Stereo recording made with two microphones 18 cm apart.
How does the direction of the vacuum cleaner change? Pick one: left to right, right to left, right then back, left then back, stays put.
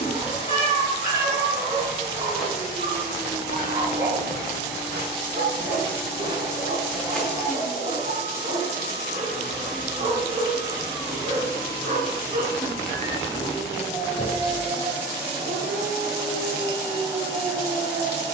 stays put.